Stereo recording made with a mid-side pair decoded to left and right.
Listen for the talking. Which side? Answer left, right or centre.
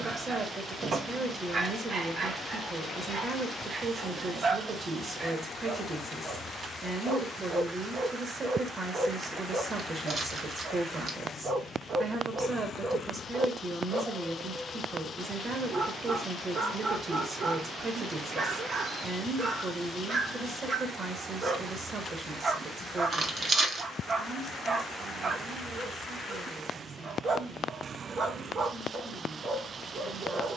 right.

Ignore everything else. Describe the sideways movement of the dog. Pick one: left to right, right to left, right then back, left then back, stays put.
stays put.